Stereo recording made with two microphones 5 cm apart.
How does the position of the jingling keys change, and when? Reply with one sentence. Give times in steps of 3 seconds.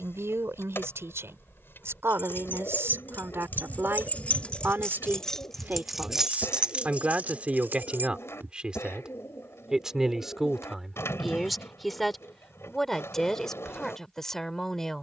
You can hear the jingling keys on the left from 0 s, on the right from 6 s and not at all from 9 s.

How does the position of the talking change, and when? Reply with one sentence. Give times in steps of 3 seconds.
You can hear the talking on the right from 0 s and in the centre from 9 s.